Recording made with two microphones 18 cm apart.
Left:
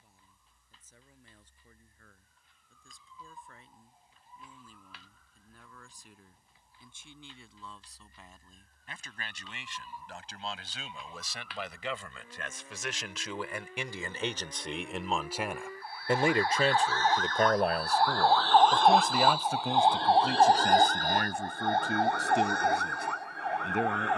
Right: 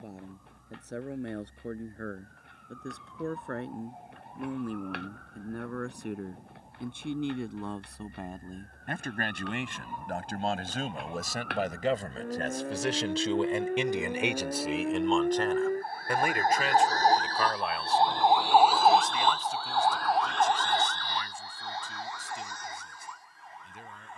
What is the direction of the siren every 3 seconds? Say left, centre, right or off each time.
right, right, right, right, right, right, centre, left.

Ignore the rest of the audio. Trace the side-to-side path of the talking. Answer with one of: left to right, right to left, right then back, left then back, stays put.
right to left.